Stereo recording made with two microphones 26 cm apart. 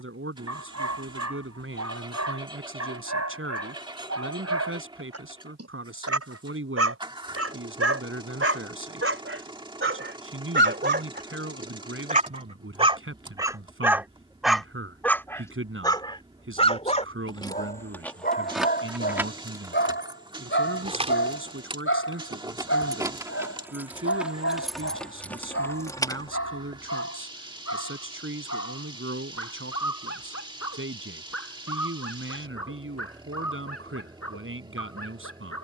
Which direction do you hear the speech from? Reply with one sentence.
You can hear the speech on the right.